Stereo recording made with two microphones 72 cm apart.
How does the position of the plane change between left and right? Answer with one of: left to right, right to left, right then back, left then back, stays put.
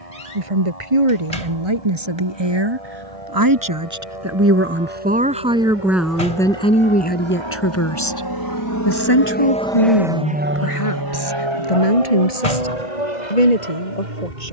left to right.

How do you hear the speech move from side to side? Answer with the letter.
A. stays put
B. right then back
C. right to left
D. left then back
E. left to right
C.